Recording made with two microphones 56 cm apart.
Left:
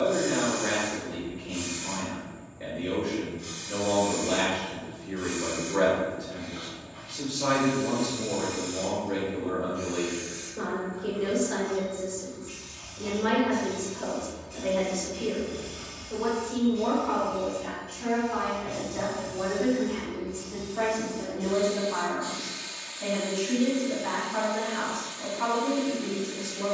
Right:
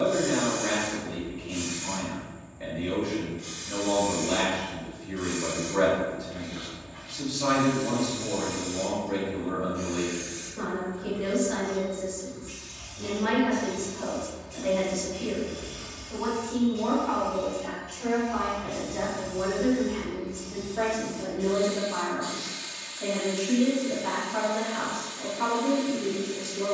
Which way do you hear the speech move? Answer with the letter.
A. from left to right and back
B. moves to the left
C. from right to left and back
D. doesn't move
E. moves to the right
B.